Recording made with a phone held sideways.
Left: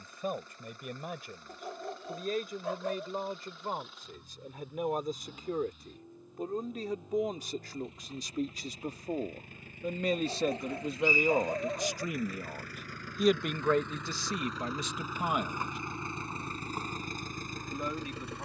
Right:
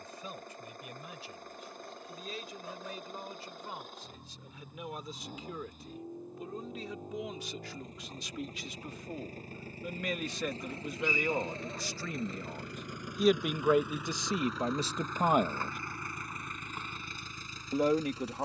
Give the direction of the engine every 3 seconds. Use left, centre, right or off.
right, right, right, right, centre, left.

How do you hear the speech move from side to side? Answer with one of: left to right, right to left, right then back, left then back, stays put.
left to right.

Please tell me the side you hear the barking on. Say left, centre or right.
left.